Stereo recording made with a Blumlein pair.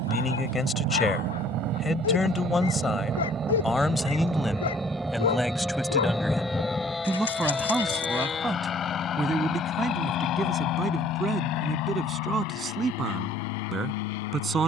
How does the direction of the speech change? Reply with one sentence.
In this clip you hear the speech go from the left side to the right.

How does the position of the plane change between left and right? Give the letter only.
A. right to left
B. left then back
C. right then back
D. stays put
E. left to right
A.